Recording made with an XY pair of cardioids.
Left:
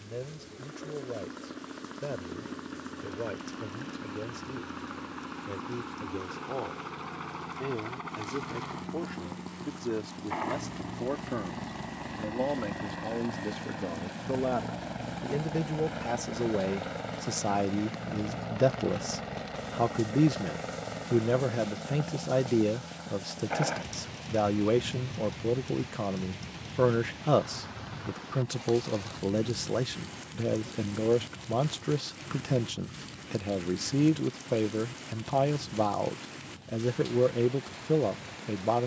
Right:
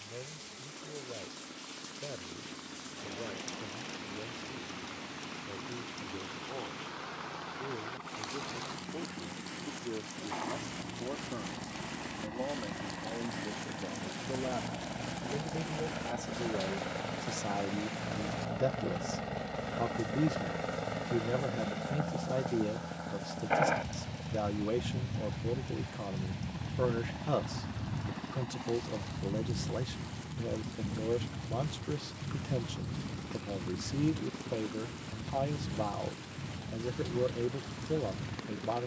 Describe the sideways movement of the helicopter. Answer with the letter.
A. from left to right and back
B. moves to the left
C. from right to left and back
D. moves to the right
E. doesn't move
D.